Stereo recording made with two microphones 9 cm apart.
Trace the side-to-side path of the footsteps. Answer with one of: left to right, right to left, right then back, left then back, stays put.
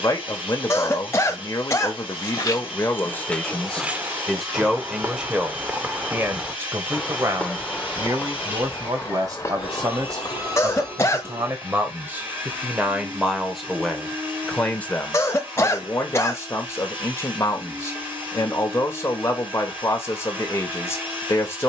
right then back.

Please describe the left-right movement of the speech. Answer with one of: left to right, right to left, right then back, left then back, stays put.
right then back.